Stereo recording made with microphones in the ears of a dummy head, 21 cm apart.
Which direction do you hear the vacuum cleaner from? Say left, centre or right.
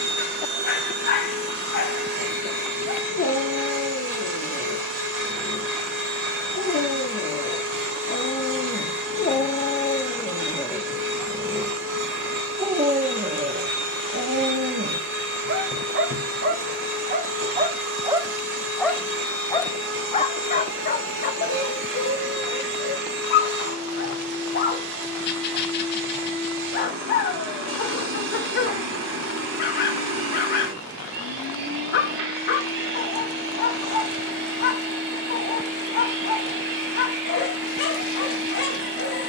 right.